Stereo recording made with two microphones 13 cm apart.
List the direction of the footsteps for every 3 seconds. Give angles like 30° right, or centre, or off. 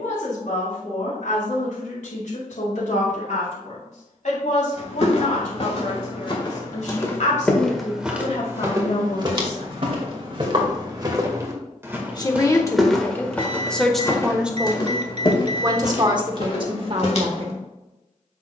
off, 50° left, 10° left, 30° right, 10° left, 50° left.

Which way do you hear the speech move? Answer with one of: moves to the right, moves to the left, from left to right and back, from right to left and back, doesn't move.
moves to the right.